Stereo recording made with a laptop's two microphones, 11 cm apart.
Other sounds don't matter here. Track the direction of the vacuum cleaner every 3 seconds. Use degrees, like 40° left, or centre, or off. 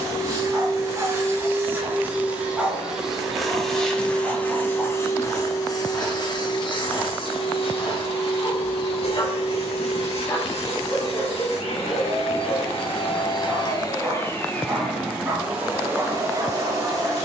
20° right, 20° left, 50° left, 70° left, 40° left, 20° right.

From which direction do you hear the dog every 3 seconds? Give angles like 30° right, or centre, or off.
20° right, centre, 30° left, 30° left, 10° right, 30° right.